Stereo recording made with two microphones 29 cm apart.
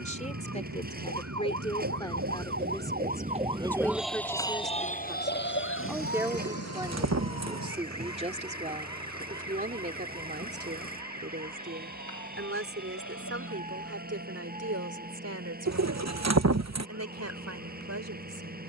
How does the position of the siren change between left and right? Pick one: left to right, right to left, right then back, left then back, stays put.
right to left.